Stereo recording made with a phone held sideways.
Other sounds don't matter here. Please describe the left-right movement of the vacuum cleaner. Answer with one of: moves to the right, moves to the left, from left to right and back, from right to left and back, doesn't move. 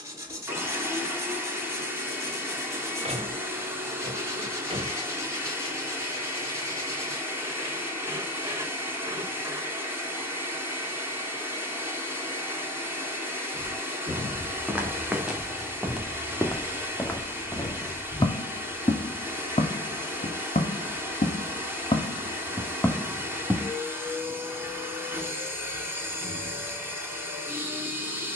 doesn't move.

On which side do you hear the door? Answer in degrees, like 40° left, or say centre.
40° right.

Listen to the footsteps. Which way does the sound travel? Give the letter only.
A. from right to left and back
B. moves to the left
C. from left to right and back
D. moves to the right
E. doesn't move
A.